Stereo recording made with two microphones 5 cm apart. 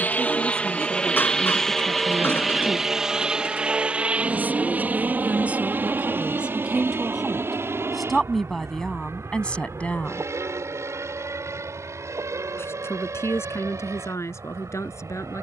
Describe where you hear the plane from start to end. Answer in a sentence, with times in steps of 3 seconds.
In this clip you hear the plane in the centre from 0 s and on the right from 3 s.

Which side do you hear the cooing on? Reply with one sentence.
In this clip you hear the cooing on the left.